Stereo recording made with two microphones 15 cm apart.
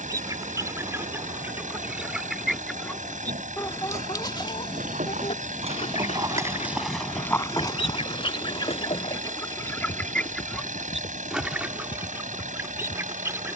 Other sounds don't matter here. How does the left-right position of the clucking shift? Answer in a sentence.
In this clip you hear the clucking move from right to left and back again.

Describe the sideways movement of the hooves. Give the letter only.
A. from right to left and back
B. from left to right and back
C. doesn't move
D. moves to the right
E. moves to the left
E.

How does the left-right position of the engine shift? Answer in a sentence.
You can hear the engine stay put.